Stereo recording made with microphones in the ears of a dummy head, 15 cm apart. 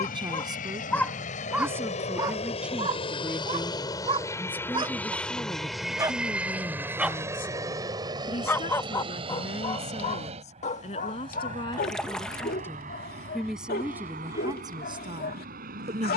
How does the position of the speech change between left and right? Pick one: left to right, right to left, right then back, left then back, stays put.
left then back.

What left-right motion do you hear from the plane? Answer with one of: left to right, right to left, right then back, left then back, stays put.
left to right.